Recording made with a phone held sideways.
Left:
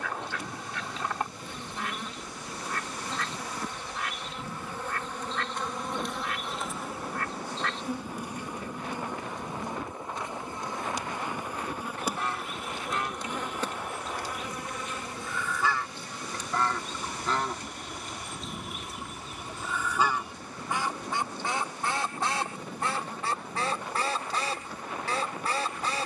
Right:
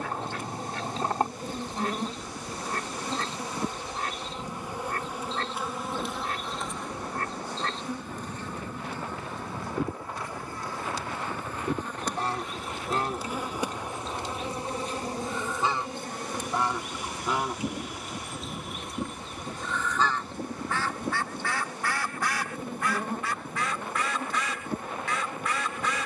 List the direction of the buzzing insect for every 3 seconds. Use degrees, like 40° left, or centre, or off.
40° right, 20° right, 10° left, 20° left, 10° right, 50° right, 50° right, 50° right, 50° right.